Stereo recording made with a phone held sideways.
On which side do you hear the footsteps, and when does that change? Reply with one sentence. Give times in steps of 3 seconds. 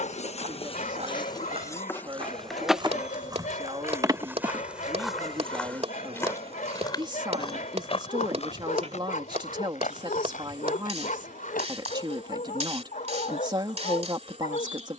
You can hear the footsteps on the right from 0 s, in the centre from 3 s, on the left from 6 s and not at all from 12 s.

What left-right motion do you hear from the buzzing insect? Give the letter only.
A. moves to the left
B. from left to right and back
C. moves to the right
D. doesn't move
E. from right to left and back
C.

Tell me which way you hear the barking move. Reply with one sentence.
You can hear the barking stay put.